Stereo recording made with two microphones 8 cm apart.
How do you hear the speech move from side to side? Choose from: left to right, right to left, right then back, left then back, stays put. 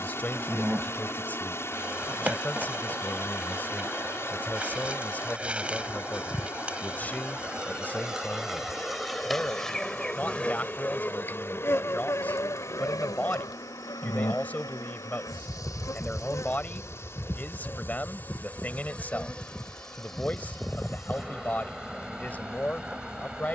stays put.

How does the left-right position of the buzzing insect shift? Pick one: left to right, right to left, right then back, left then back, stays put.
left then back.